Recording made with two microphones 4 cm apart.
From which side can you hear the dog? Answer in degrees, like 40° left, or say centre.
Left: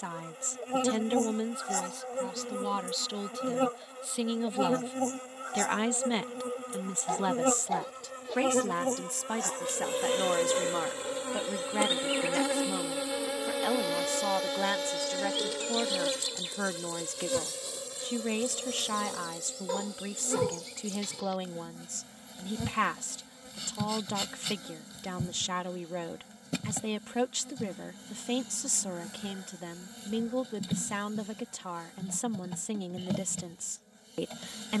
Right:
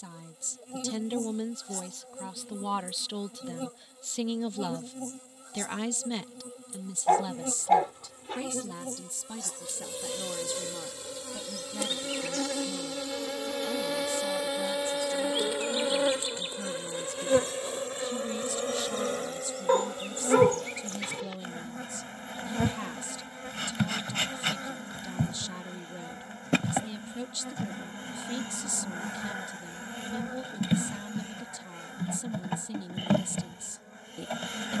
40° right.